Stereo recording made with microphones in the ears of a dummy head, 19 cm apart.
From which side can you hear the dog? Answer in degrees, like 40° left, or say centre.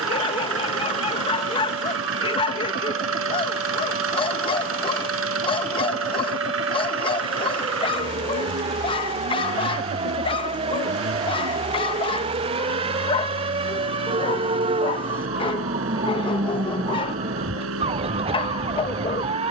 30° left.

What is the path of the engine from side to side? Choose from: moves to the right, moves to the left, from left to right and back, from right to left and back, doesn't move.
doesn't move.